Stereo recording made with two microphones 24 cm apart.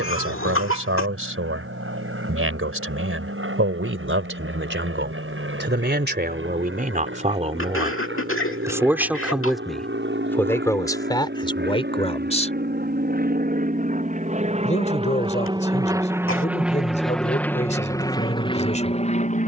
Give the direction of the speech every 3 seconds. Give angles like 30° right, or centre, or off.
60° right, 60° right, 30° right, 10° left, 30° left, 30° left, 30° left.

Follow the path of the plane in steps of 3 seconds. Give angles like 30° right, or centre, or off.
70° right, 70° right, 60° right, 60° right, 40° right, 10° right, 20° left.